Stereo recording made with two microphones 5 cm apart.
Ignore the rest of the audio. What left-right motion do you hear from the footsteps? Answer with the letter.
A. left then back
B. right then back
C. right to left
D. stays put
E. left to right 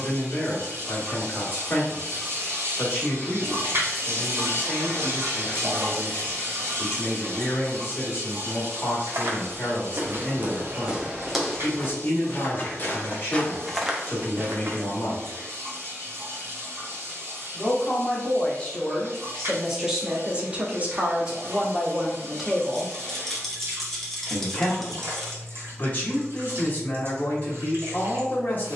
A.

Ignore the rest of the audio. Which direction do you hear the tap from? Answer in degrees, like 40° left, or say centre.
50° right.